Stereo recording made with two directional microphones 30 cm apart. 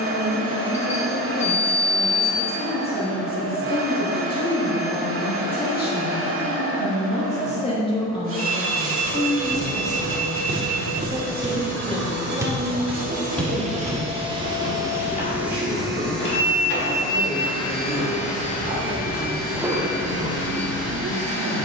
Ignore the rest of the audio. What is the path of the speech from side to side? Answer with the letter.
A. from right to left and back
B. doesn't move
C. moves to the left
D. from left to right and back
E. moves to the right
E.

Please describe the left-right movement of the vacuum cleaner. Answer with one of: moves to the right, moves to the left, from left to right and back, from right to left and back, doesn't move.
moves to the left.